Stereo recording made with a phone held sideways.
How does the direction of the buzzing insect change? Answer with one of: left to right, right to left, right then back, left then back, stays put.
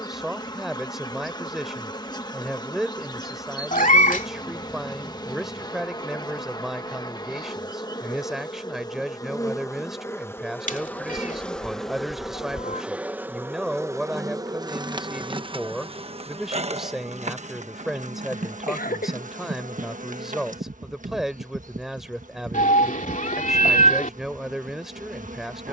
left to right.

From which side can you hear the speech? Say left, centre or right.
centre.